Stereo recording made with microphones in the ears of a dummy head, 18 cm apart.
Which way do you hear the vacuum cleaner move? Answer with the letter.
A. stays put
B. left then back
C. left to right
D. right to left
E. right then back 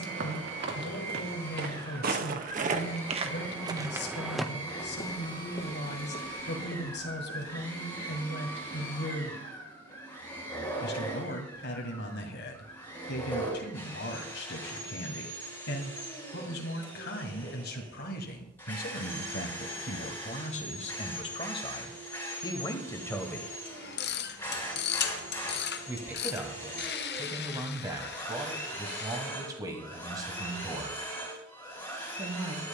A.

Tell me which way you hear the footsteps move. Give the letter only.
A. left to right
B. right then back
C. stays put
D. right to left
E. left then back
D.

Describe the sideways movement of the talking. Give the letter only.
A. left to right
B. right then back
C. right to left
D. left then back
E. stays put
A.